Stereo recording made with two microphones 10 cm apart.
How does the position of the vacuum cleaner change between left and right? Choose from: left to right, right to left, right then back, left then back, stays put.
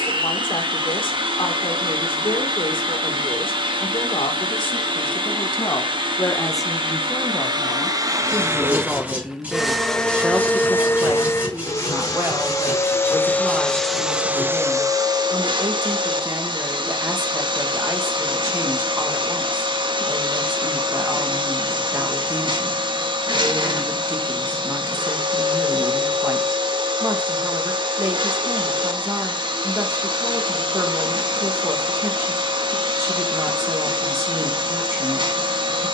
left then back.